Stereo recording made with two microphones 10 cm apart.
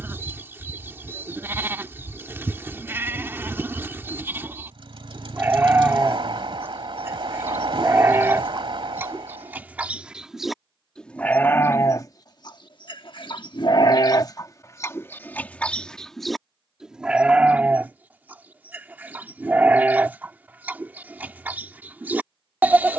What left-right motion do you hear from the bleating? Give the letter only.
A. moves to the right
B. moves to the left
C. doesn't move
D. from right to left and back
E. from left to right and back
D.